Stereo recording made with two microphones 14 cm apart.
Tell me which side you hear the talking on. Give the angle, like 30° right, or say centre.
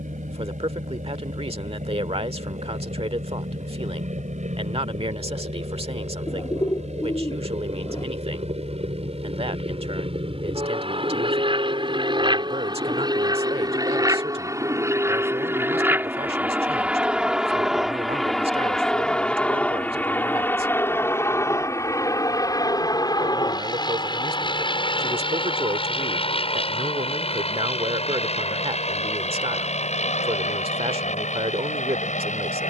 40° right.